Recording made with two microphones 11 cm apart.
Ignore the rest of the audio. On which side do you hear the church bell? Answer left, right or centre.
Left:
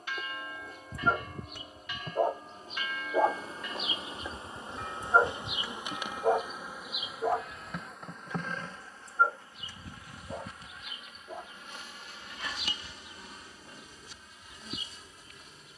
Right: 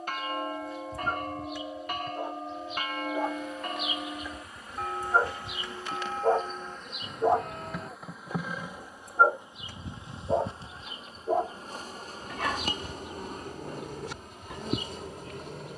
right.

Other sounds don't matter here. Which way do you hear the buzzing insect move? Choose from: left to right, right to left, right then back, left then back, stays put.
left to right.